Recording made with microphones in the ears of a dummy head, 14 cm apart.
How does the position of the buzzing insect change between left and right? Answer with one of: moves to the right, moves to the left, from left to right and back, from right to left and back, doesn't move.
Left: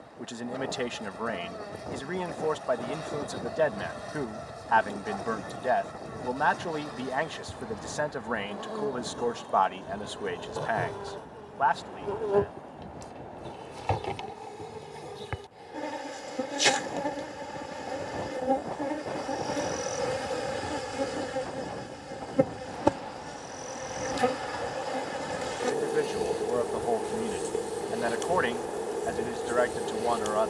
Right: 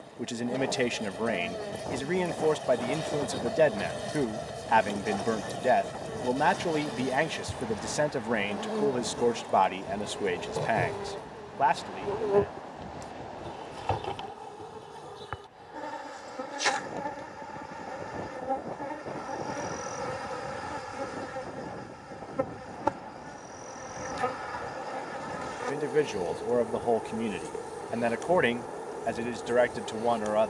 moves to the left.